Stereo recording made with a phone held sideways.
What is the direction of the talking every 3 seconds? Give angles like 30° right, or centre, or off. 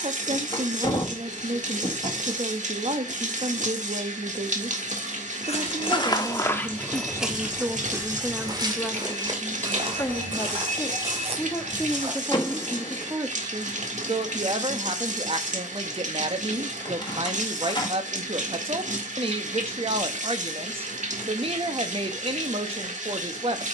50° right, 50° right, 10° right, 20° left, 20° right, 40° right, 40° right, 40° right.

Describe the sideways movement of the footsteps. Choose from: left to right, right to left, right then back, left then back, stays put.
left to right.